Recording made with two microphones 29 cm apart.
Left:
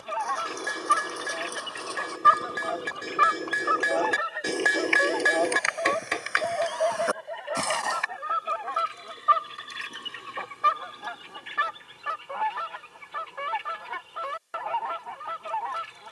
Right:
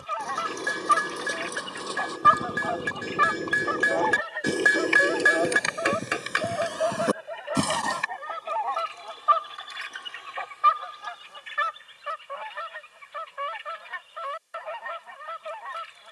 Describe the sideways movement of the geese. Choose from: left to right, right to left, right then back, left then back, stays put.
right then back.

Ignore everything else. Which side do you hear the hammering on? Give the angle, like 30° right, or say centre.
10° right.